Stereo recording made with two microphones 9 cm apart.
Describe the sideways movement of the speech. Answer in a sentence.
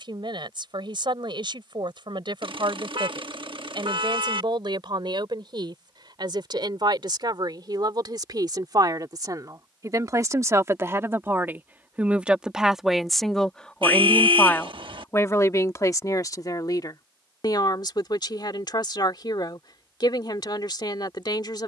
In this clip you hear the speech move from right to left.